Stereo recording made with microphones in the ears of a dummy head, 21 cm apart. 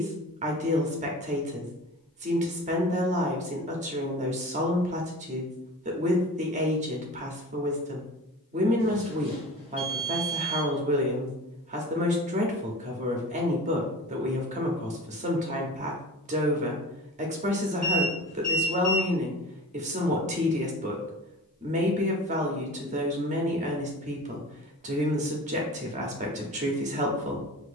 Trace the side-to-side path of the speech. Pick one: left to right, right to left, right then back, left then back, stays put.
stays put.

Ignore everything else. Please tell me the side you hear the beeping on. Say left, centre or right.
right.